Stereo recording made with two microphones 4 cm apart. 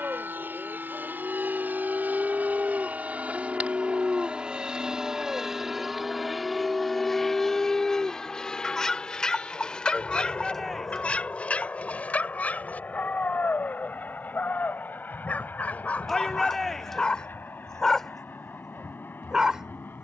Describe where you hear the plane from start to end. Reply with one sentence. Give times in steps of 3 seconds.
In this clip you hear the plane on the right from 0 s, in the centre from 6 s and on the left from 9 s.